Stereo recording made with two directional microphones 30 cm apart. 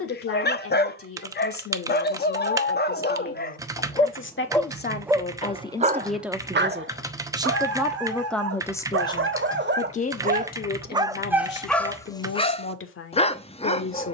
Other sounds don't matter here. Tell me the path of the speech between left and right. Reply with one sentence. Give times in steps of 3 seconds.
You can hear the speech on the left from 0 s, in the centre from 6 s and on the left from 9 s.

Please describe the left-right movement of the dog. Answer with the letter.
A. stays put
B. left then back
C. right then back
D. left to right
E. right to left
C.